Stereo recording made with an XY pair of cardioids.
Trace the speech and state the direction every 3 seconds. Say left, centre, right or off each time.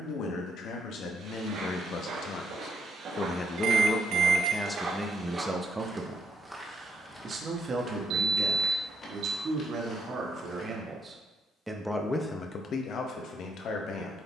left, centre, right, right, left.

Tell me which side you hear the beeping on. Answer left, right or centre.
right.